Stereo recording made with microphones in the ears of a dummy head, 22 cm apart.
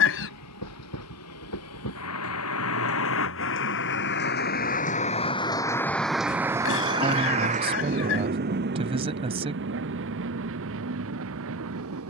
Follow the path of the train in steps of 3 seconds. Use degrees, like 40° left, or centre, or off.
70° left, 40° left, 30° right, 60° right.